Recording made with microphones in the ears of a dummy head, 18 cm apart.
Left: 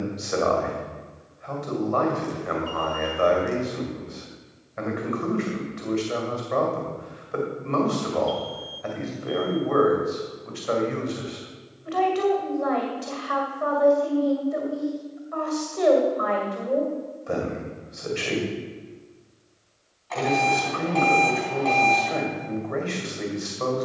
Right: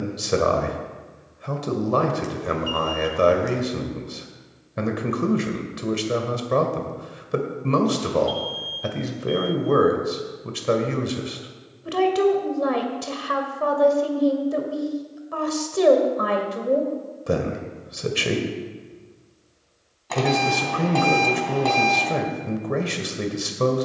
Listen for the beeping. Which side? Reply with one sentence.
In this clip you hear the beeping on the right.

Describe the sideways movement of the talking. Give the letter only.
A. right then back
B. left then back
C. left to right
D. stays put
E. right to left
D.